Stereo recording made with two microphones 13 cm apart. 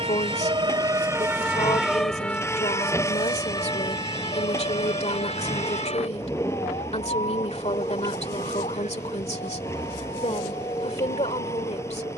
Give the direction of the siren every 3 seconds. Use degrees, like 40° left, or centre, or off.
10° right, 40° left, 50° left, 60° left.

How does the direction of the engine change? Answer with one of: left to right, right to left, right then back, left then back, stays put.
stays put.